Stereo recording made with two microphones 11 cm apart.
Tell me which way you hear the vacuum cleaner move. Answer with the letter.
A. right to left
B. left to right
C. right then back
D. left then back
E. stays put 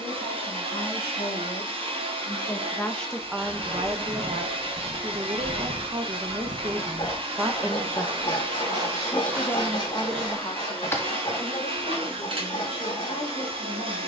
E.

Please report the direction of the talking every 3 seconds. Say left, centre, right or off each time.
left, right, right, left, left.